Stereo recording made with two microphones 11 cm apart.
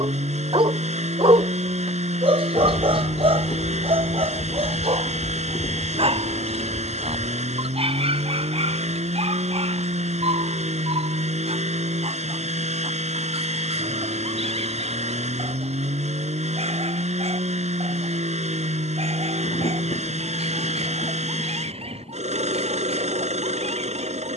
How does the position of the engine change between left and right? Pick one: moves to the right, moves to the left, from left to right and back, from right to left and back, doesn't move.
doesn't move.